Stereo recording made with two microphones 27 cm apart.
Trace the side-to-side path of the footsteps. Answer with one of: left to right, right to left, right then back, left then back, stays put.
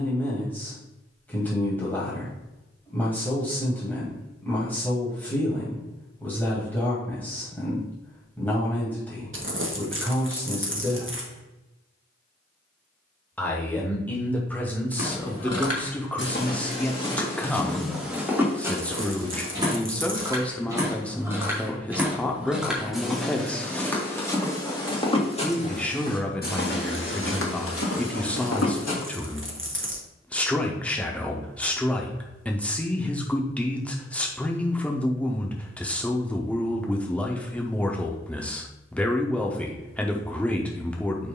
right then back.